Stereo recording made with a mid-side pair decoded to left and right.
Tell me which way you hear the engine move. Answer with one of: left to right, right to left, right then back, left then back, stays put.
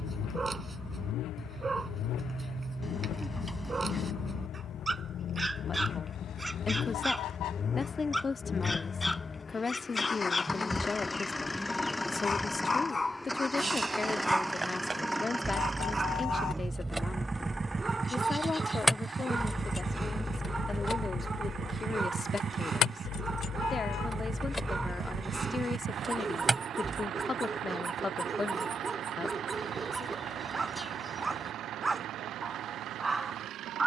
left to right.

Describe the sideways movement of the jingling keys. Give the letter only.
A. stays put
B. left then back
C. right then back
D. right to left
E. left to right
B.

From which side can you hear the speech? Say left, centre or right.
left.